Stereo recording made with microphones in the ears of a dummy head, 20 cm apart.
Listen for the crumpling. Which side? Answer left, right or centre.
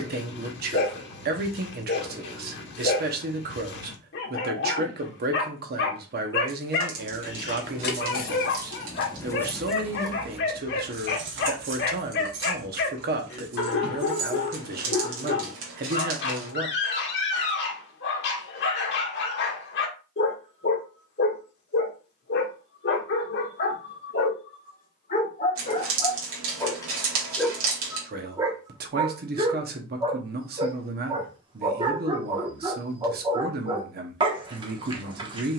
right.